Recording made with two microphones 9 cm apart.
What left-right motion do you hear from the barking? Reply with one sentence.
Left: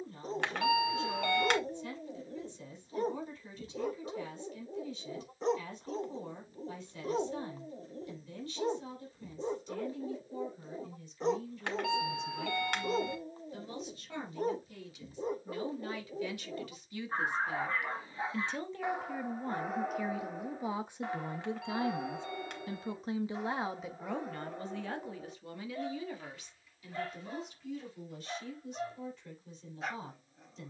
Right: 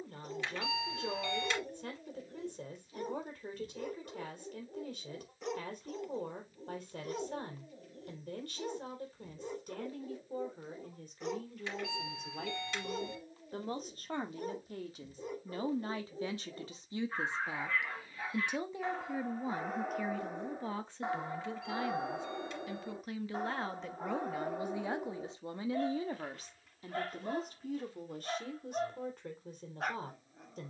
In this clip you hear the barking move from left to right.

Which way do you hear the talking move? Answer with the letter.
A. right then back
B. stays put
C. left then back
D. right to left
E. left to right
C.